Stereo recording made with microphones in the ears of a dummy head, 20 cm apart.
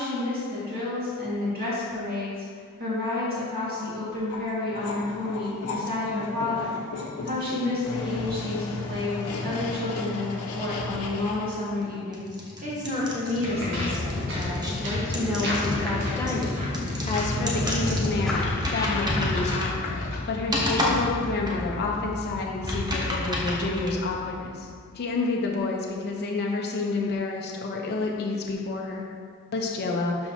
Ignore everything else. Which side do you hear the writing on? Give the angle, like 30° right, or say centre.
70° left.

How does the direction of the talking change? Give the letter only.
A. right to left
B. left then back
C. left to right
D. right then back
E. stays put
A.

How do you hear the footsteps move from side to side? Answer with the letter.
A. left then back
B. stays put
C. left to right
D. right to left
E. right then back
D.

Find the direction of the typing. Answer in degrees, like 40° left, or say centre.
20° right.